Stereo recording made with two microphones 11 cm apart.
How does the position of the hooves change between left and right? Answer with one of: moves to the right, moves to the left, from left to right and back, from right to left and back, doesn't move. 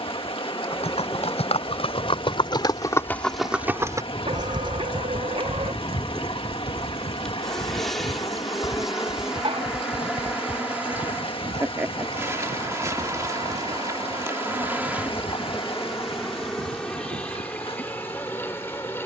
moves to the right.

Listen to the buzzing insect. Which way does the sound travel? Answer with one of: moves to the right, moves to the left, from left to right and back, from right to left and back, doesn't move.
from left to right and back.